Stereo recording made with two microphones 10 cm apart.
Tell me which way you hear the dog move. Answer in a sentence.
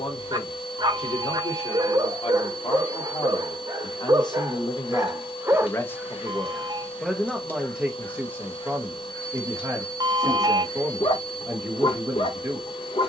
You can hear the dog travel towards the left.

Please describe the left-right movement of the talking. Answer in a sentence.
In this clip you hear the talking move from left to right.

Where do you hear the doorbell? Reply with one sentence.
You can hear the doorbell on the right.